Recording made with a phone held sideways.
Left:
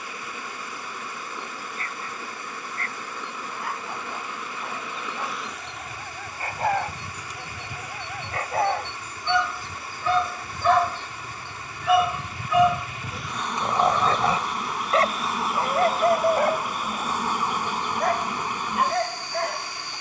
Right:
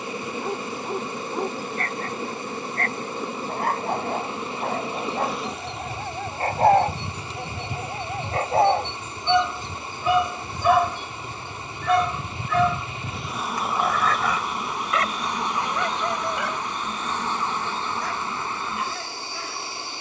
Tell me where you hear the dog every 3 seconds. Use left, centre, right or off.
right, right, right, centre, left, left, left.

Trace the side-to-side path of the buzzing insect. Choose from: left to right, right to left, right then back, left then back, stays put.
right to left.